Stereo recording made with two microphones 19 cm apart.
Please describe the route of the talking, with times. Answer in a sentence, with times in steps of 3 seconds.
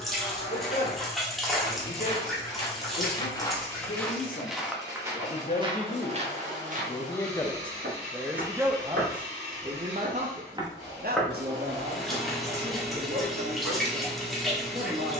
In this clip you hear the talking on the left from 0 s, in the centre from 6 s and on the right from 9 s.